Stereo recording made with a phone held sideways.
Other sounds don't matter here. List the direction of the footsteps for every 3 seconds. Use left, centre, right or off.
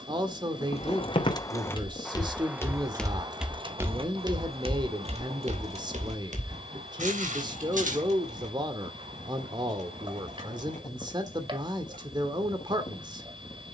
left, right, right, off, off.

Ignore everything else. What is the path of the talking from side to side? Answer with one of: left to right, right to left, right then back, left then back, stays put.
stays put.